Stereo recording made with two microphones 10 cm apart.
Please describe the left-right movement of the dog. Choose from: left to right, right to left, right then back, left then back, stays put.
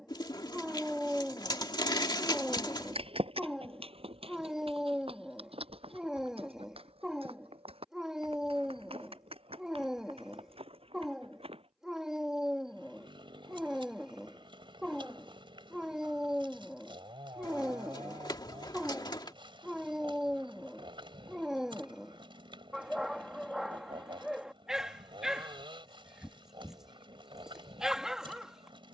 stays put.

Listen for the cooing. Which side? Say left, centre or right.
left.